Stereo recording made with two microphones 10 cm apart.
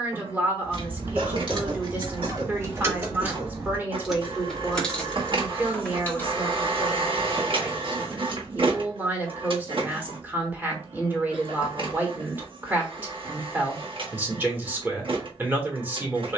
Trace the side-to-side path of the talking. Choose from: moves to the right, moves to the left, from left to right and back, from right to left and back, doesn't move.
doesn't move.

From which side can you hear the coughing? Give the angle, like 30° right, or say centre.
60° right.